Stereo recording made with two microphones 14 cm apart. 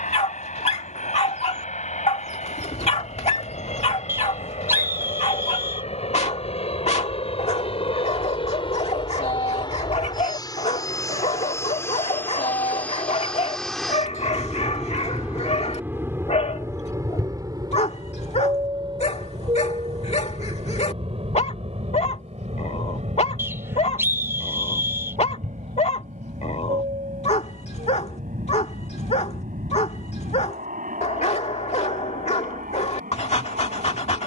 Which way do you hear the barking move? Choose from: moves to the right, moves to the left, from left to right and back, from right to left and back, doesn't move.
doesn't move.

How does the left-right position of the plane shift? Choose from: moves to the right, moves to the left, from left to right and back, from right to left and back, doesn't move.
moves to the right.